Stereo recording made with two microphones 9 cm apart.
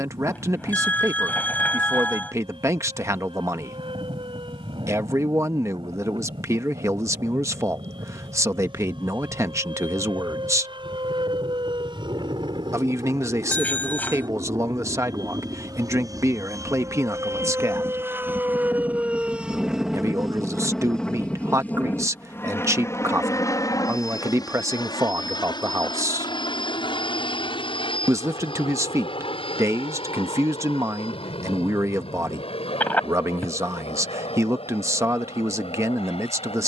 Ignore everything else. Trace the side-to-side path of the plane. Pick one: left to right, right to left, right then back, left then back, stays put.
right to left.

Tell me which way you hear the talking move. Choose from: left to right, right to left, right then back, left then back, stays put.
stays put.